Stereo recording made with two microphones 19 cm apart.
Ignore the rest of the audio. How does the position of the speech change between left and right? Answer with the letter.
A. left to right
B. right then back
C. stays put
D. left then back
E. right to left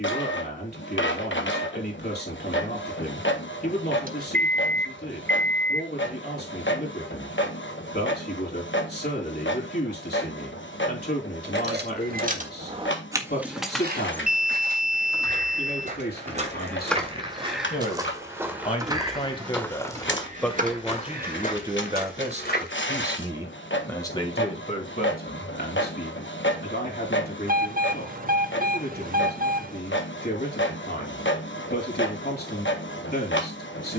B.